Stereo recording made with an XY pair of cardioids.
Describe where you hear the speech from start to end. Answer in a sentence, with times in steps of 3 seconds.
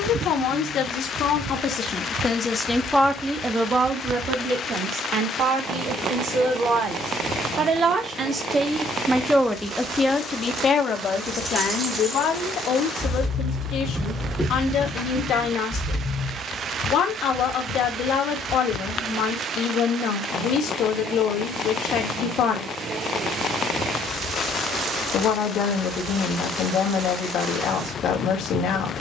In this clip you hear the speech on the left from 0 s, on the right from 3 s and on the left from 9 s.